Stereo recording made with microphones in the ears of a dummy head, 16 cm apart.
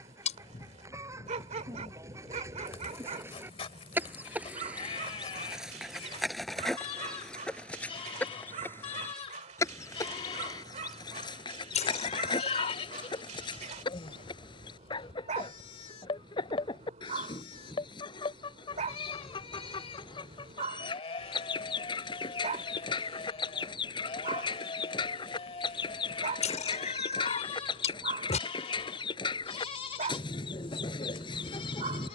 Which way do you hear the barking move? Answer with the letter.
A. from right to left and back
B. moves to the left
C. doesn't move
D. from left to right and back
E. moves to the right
C.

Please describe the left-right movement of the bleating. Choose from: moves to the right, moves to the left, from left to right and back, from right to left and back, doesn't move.
doesn't move.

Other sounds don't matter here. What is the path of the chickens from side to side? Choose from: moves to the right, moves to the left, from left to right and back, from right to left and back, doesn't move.
moves to the left.